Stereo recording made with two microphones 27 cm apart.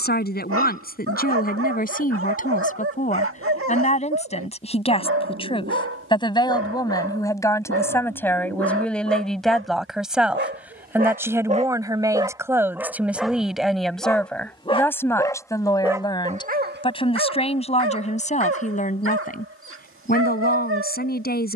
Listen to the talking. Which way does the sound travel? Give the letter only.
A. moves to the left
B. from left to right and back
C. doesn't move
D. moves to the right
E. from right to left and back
B.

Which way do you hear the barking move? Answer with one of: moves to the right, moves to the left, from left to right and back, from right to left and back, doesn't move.
from right to left and back.